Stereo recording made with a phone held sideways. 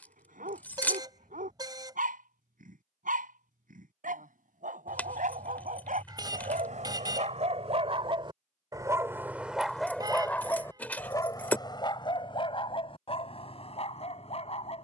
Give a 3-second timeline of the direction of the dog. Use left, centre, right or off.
right, right, right, centre, left.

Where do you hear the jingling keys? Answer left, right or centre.
centre.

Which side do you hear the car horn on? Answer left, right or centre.
right.